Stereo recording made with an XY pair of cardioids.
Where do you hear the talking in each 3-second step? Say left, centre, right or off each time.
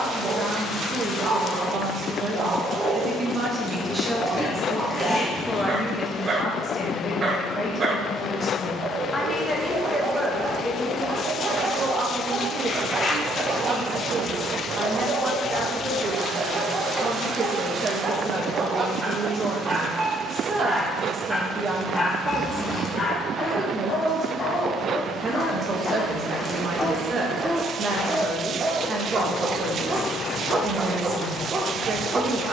right, centre, left, centre, right, right, right, right, right, right, right.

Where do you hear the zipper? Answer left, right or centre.
left.